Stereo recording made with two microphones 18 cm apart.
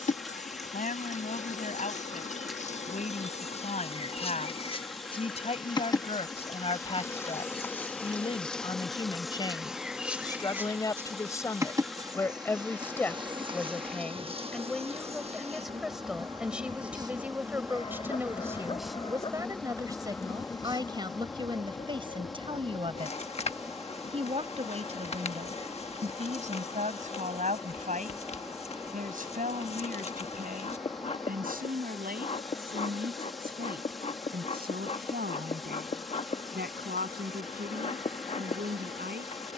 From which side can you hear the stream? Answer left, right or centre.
centre.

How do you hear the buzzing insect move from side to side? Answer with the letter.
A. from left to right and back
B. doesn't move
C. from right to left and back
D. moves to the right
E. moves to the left
A.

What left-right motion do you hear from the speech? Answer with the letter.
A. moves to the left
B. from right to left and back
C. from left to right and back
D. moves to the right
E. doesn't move
D.